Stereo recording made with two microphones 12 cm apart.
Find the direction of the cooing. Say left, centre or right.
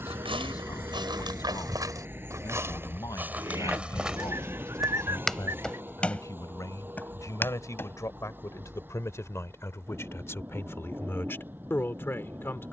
right.